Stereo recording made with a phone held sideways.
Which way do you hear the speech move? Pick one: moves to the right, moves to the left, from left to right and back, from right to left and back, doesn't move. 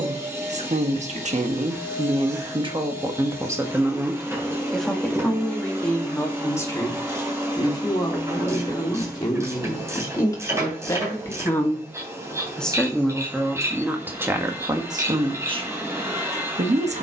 from right to left and back.